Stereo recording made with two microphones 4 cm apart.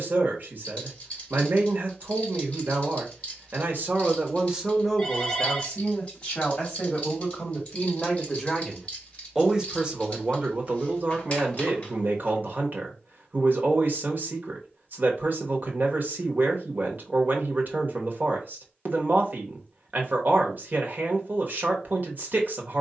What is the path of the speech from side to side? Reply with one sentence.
In this clip you hear the speech go left and come back.